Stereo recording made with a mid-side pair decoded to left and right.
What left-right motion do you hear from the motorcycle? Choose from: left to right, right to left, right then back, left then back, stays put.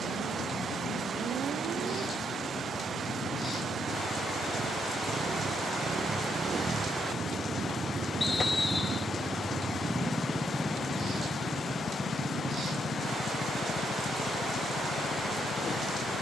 right to left.